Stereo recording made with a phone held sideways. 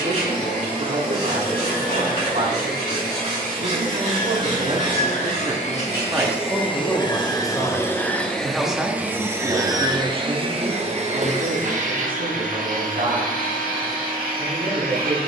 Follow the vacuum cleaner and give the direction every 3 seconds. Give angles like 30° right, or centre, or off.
70° left, 50° left, 20° left, 30° right, 60° right.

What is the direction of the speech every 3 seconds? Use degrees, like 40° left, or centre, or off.
60° right, 50° right, 10° left, 40° right, 60° right.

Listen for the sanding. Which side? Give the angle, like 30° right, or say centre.
40° right.